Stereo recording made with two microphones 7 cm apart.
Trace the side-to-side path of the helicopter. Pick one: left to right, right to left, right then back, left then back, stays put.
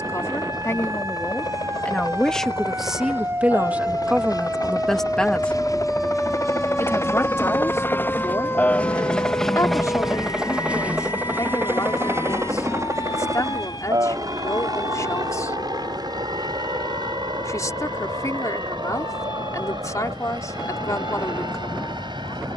left to right.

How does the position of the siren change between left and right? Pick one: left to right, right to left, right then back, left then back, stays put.
right to left.